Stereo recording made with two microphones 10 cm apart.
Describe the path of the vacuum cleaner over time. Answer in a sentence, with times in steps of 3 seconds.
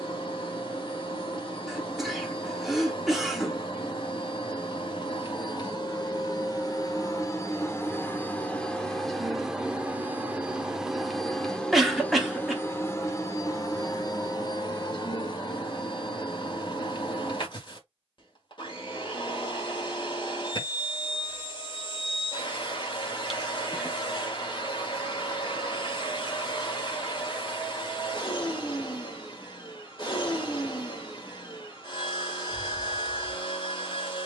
You can hear the vacuum cleaner on the left from 0 s, in the centre from 9 s and on the left from 12 s.